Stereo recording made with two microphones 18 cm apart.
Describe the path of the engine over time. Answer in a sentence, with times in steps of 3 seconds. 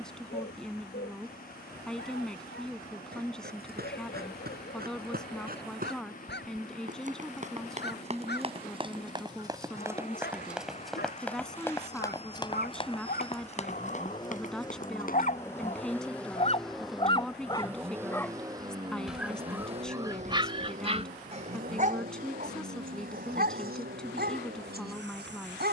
You can hear the engine on the left from 0 s, in the centre from 15 s and on the right from 18 s.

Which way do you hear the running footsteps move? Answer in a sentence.
In this clip you hear the running footsteps move to the left.